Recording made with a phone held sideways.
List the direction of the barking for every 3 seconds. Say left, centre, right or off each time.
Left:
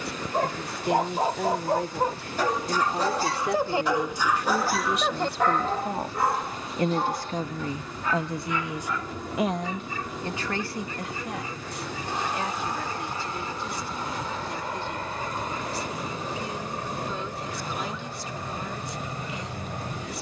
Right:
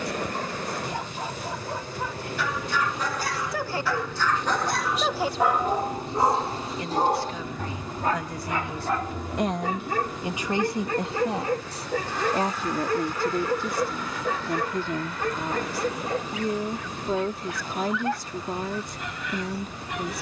left, centre, right, right, right, right, right.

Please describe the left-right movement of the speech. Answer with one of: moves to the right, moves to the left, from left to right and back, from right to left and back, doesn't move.
moves to the right.